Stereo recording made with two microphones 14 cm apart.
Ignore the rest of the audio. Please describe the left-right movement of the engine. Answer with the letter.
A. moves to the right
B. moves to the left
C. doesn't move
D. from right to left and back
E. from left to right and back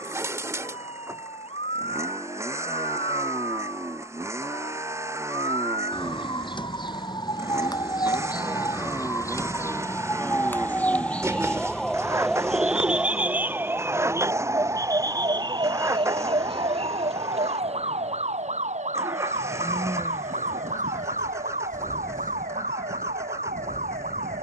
C.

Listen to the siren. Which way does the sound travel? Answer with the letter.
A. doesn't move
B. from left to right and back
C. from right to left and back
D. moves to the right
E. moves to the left
D.